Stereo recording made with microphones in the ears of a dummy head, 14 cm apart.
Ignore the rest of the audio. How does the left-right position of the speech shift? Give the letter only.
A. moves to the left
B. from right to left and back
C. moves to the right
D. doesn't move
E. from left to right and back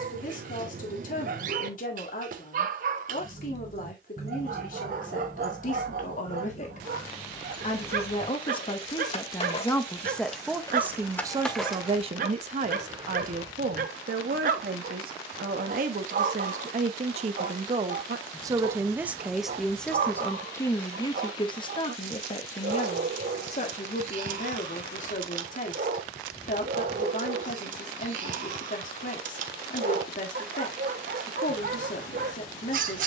E.